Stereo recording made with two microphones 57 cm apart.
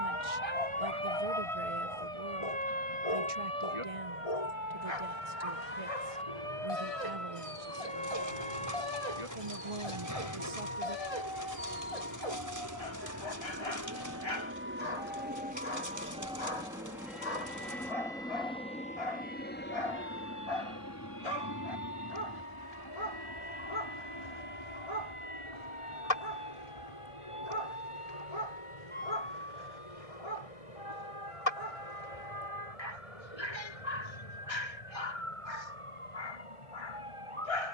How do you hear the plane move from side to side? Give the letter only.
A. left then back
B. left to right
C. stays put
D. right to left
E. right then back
D.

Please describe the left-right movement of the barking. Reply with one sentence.
In this clip you hear the barking stay put.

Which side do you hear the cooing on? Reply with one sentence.
In this clip you hear the cooing on the right.